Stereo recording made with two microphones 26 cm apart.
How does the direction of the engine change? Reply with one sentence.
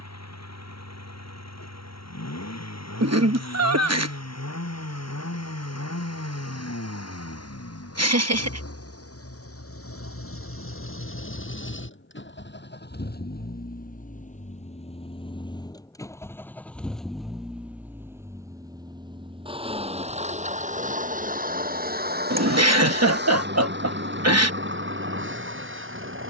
In this clip you hear the engine go from the left side to the right.